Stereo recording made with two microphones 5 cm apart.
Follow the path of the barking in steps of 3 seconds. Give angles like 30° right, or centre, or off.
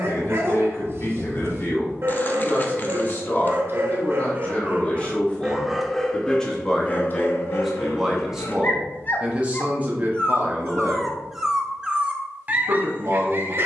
50° right, 30° right, 40° left, 10° left, 40° right.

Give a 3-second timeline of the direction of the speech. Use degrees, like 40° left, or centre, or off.
50° left, 30° left, centre, 30° right, 60° right.